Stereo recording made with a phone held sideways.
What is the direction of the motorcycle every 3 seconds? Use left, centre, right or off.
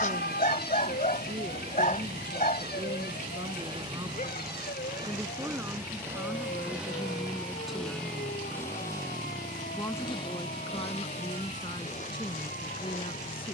right, right, centre, left, left.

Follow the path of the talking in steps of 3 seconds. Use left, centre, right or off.
right, right, centre, left, left.